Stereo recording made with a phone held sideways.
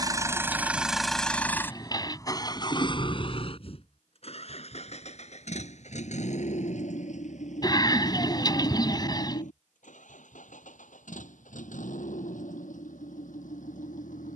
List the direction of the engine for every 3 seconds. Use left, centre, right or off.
centre, left, left, left, left.